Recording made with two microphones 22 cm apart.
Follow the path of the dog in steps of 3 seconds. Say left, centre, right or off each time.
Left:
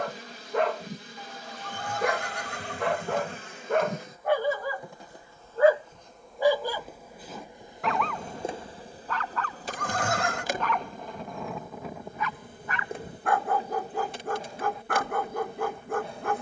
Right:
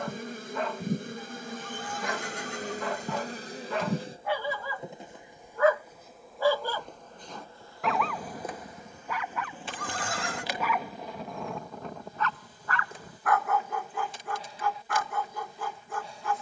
left, left, centre, centre, left, left.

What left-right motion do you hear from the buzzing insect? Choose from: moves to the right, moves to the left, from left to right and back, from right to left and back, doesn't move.
moves to the left.